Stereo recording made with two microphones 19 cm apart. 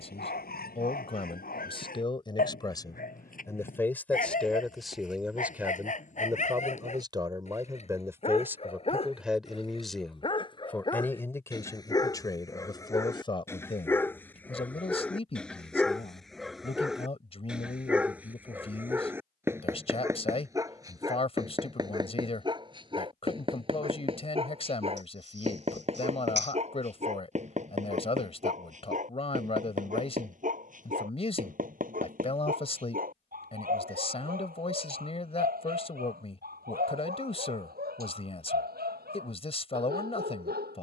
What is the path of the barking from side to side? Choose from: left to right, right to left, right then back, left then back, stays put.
left to right.